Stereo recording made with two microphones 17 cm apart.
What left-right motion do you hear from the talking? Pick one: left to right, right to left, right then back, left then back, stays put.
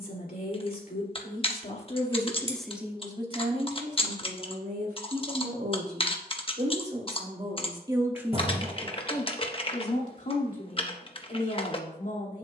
right then back.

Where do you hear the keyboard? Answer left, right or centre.
left.